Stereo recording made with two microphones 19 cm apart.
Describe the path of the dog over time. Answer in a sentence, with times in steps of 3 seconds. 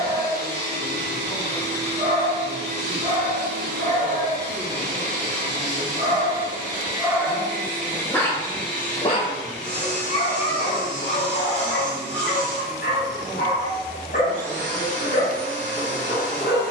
You can hear the dog on the right from 0 s, in the centre from 6 s and on the left from 9 s.